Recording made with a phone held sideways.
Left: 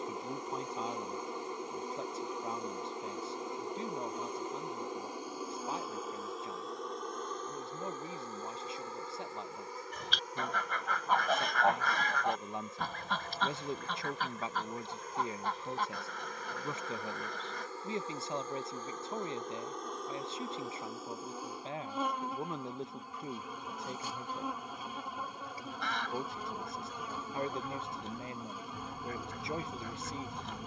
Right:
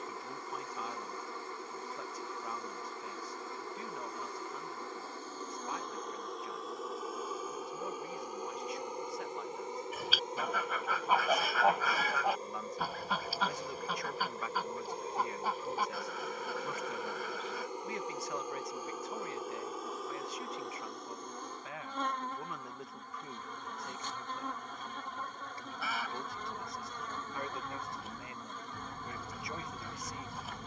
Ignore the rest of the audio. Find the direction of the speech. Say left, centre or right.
left.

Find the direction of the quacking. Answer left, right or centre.
centre.